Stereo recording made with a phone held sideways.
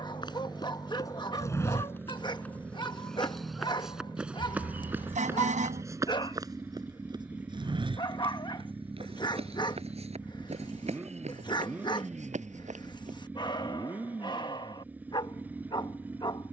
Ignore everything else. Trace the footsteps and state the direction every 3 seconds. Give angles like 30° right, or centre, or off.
20° left, 10° right, 30° right, 40° right, 50° right, off.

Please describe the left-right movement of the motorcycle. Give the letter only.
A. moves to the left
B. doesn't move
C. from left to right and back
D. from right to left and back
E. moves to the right
B.